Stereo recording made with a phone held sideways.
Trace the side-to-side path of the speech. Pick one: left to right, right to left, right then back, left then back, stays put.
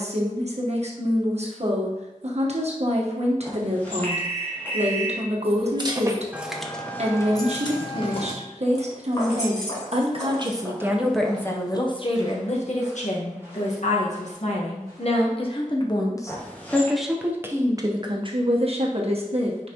left then back.